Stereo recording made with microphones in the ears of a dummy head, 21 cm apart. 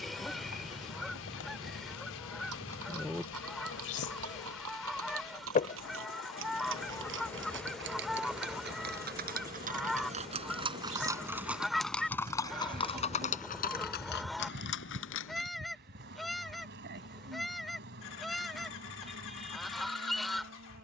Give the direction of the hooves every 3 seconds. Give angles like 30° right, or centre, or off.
70° right, 60° right, 50° right, 20° right, 30° left, 60° left, off.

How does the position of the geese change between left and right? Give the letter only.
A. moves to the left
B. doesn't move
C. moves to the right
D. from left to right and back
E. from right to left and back
B.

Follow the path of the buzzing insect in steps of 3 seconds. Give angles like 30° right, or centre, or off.
70° left, 50° left, centre, 30° right, 40° right, 50° right, 50° right.